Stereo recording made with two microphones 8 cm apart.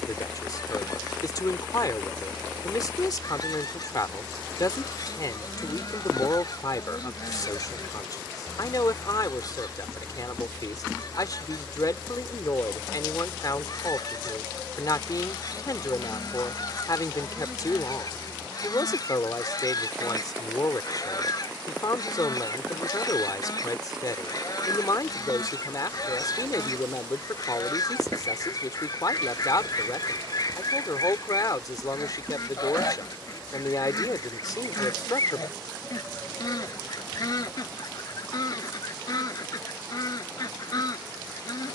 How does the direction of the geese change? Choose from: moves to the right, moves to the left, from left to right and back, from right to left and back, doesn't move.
doesn't move.